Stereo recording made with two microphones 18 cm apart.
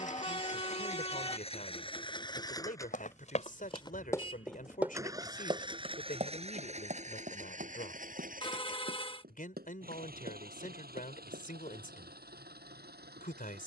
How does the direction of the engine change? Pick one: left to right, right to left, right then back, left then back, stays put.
left to right.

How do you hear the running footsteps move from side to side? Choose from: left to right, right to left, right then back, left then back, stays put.
left to right.